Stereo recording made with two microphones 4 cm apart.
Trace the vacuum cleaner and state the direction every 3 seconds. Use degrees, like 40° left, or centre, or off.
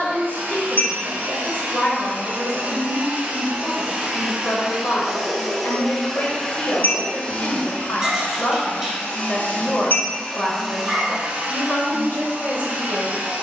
40° right, 10° right, 30° left, centre, 40° right.